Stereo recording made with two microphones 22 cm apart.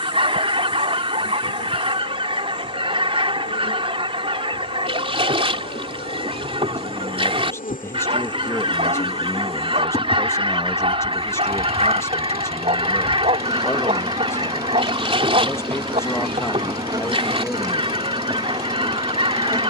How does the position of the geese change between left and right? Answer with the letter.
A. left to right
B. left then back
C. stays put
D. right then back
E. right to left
C.